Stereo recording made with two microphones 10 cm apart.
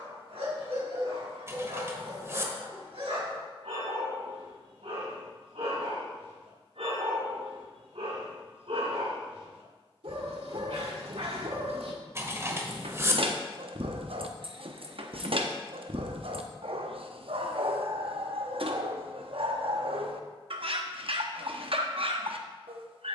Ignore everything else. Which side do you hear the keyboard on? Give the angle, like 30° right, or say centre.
30° right.